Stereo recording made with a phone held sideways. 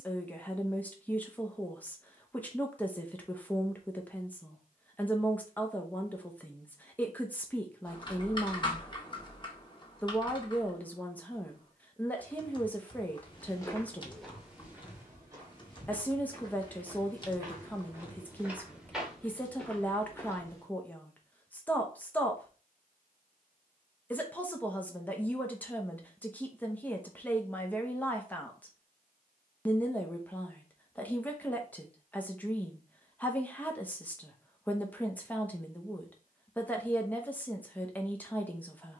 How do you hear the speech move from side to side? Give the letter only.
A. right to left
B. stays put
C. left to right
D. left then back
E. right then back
B.